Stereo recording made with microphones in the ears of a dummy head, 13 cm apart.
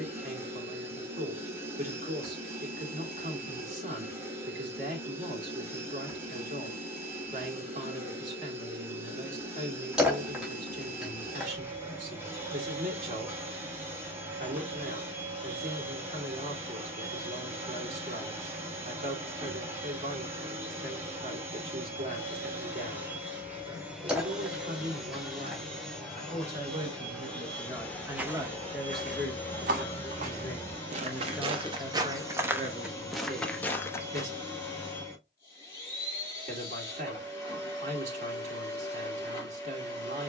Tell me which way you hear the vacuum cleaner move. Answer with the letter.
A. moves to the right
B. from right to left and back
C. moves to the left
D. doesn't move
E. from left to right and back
C.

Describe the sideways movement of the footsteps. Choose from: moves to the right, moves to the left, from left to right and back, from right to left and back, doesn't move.
from left to right and back.